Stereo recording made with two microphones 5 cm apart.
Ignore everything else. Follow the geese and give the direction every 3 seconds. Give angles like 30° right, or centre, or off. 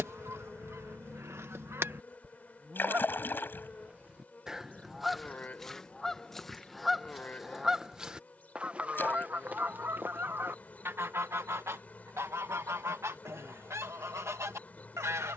60° right, 10° right, centre, 50° right, 80° right.